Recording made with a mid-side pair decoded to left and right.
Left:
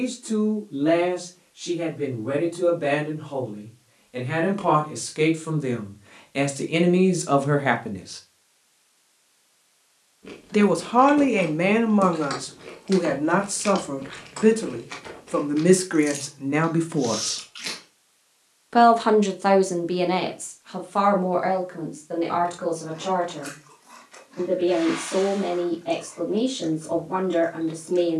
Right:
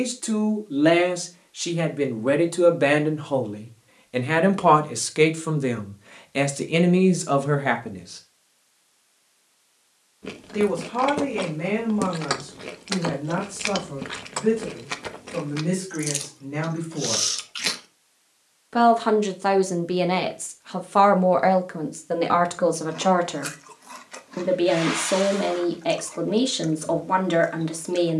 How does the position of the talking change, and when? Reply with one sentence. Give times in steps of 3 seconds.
You can hear the talking on the right from 0 s, in the centre from 6 s, on the left from 9 s, in the centre from 18 s and on the right from 21 s.